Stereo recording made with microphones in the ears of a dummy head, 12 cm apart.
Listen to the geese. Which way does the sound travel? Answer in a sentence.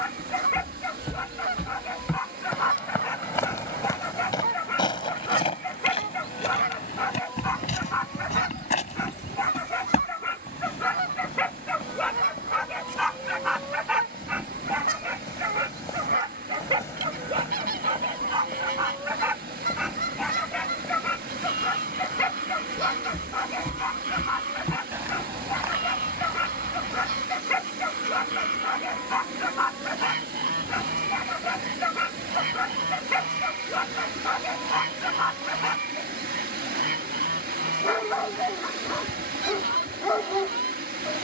You can hear the geese stay in one place.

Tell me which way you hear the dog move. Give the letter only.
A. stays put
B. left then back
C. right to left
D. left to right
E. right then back
E.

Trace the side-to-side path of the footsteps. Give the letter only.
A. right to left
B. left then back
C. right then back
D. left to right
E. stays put
B.